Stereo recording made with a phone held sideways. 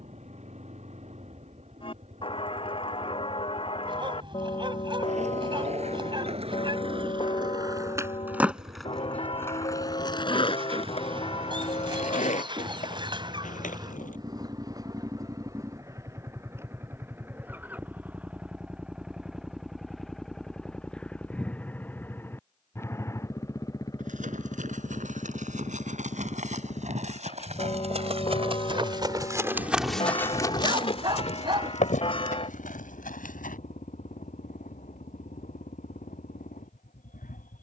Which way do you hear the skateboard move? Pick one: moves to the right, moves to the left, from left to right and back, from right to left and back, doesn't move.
moves to the left.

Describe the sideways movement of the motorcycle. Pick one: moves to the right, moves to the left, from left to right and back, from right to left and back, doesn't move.
moves to the left.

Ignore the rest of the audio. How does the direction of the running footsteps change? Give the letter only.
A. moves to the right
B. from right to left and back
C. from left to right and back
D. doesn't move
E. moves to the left
E.